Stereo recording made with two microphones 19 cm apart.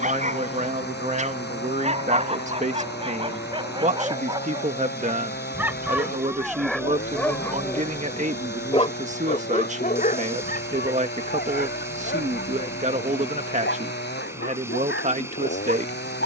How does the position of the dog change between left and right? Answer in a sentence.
You can hear the dog move to the left.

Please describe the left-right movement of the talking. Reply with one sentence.
You can hear the talking stay in one place.